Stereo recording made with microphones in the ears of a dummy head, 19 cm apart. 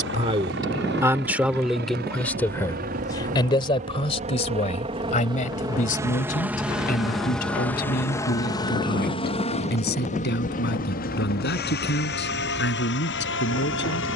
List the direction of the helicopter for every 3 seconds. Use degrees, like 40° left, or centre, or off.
50° right, 30° right, centre, 40° left, 50° left.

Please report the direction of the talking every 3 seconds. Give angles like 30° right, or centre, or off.
centre, 30° left, 40° left, 50° left, 50° left.